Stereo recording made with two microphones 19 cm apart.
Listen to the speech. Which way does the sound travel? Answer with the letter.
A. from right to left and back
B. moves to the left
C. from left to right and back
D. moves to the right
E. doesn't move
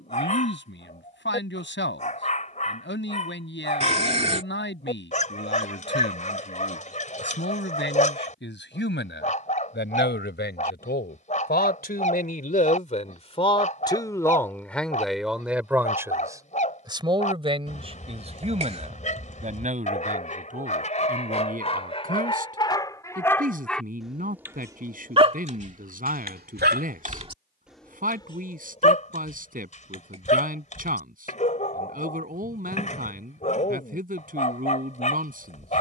D.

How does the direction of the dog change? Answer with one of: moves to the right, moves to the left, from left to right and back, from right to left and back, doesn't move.
from left to right and back.